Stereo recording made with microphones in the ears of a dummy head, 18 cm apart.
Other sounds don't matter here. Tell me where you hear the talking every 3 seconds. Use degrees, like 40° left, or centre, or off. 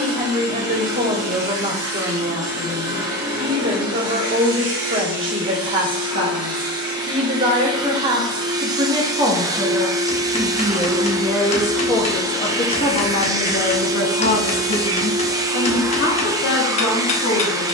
40° right, 40° right, 30° right, centre, 40° left, 60° left.